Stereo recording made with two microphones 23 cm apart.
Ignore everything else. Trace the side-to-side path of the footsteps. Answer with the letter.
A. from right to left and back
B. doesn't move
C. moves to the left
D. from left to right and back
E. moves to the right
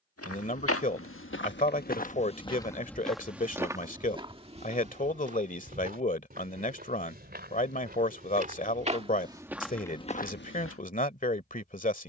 D.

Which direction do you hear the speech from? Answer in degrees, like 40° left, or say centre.
30° left.